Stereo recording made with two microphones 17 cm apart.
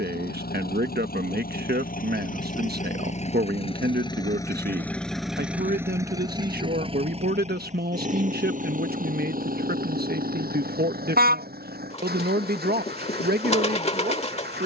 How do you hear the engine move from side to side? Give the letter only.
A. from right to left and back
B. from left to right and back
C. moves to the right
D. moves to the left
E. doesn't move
C.